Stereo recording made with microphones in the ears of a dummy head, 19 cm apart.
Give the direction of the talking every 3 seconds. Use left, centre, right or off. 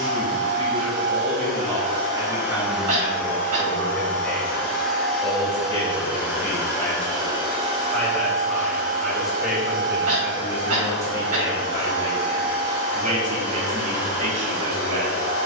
right, centre, centre, centre, right.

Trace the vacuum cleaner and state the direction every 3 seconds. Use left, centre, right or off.
right, centre, right, right, right.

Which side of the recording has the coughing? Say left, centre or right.
right.